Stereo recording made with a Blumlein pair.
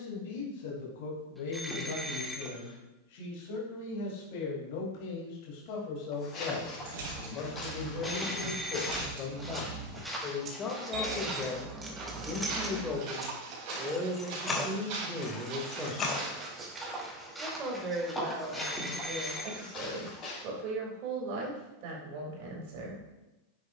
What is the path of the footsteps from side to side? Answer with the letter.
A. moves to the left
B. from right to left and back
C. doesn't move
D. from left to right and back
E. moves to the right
D.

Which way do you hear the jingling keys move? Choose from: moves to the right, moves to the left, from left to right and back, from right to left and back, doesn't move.
moves to the left.